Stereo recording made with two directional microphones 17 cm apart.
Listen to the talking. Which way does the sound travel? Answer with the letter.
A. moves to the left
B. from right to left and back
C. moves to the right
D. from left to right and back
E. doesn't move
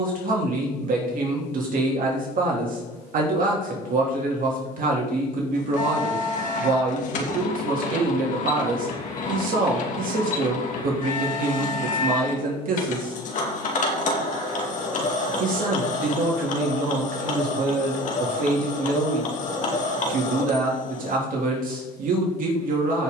E.